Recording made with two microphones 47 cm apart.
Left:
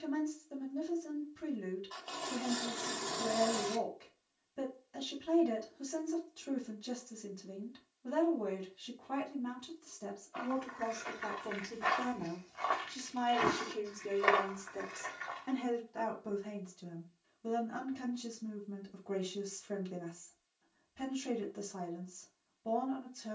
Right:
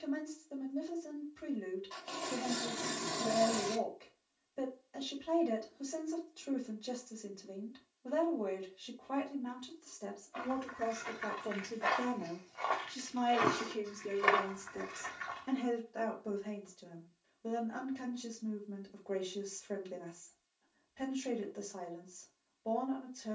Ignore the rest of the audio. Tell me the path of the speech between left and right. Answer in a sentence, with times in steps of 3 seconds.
You can hear the speech on the left from 0 s, in the centre from 12 s and on the left from 15 s.